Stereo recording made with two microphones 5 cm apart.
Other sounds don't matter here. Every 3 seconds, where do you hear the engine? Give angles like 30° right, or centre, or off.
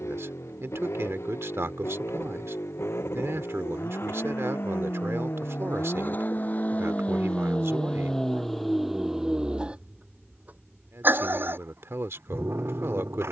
70° left, 50° left, 20° left, 30° right, 60° right.